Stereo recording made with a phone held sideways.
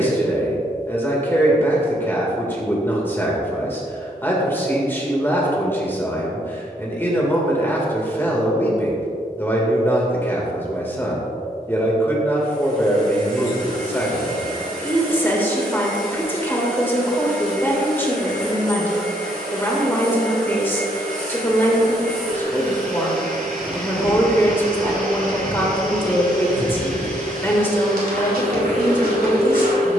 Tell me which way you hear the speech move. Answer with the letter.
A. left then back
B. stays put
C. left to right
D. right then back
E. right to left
B.